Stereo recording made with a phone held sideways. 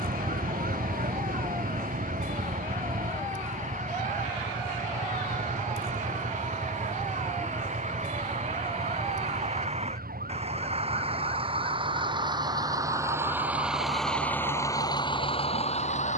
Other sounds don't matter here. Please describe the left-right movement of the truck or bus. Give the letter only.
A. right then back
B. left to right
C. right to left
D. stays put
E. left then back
C.